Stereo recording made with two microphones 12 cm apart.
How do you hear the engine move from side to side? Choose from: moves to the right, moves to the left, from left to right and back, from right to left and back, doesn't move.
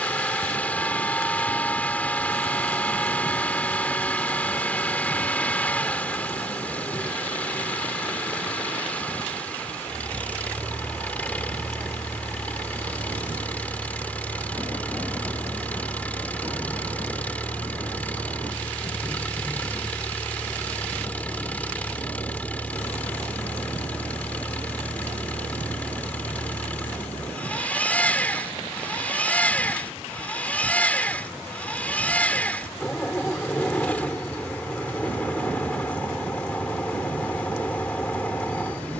doesn't move.